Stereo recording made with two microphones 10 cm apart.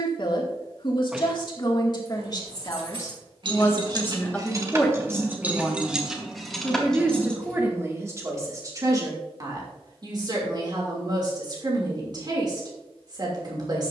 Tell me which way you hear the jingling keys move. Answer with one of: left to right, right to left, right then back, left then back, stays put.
right to left.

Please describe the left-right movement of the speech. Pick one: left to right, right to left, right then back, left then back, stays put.
left to right.